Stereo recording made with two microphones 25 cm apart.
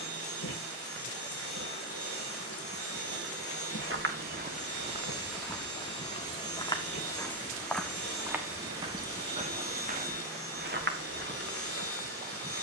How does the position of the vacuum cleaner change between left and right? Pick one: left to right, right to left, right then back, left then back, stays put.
stays put.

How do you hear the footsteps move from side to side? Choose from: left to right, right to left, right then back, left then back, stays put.
left then back.